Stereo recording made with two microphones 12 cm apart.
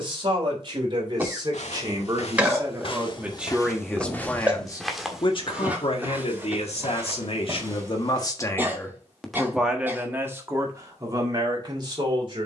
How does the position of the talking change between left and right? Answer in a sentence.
In this clip you hear the talking move from right to left and back again.